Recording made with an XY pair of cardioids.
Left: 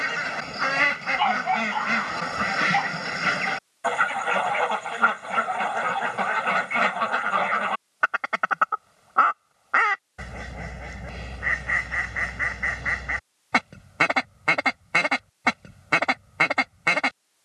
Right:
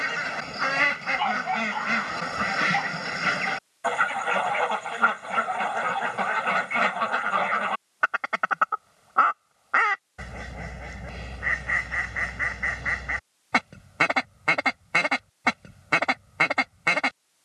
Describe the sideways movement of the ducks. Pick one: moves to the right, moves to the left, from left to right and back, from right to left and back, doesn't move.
doesn't move.